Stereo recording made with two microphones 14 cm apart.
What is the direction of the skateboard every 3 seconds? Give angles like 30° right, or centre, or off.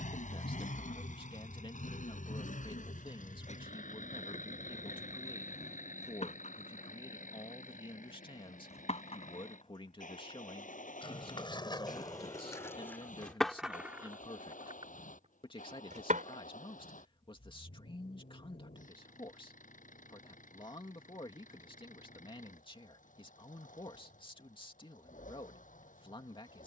off, 60° left, 50° left, 40° left, 10° left, 70° right, off, off, off.